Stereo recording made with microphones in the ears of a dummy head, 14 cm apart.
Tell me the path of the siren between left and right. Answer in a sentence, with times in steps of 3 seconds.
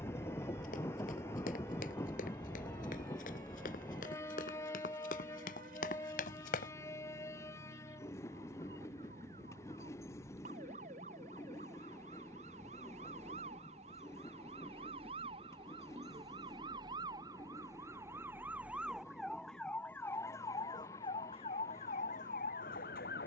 You can hear the siren on the right from 0 s, in the centre from 18 s and on the left from 21 s.